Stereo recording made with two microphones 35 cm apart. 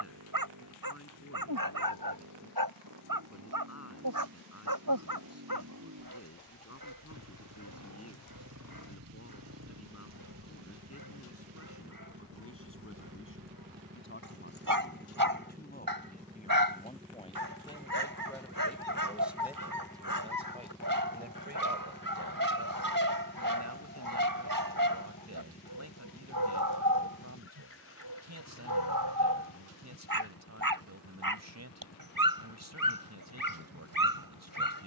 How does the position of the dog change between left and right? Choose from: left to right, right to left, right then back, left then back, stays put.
stays put.